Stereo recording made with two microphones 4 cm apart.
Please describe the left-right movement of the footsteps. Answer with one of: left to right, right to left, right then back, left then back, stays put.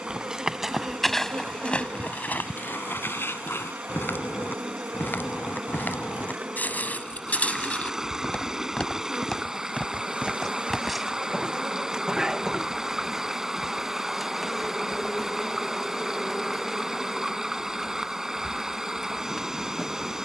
left then back.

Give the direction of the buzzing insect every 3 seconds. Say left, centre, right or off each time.
right, right, right, right, centre, centre, centre.